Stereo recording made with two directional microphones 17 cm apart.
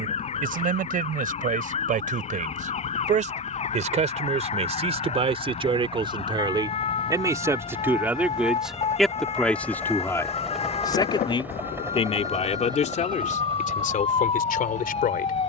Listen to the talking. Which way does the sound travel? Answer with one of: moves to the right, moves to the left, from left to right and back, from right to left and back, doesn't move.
moves to the left.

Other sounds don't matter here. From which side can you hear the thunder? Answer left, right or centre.
left.